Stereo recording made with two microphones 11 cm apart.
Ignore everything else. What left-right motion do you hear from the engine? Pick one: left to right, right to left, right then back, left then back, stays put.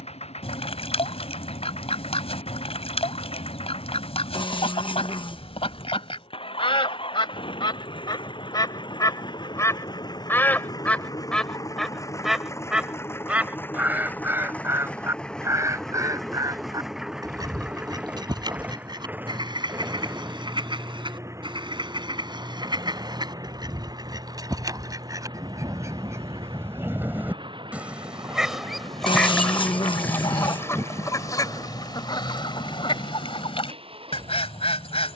left to right.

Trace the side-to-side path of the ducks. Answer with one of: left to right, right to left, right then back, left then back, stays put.
right then back.